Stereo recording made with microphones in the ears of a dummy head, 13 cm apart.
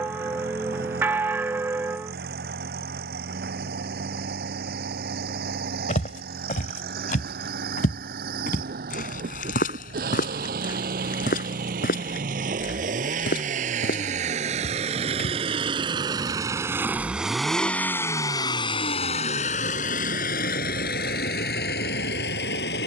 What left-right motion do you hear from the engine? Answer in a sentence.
You can hear the engine go from the right side to the left.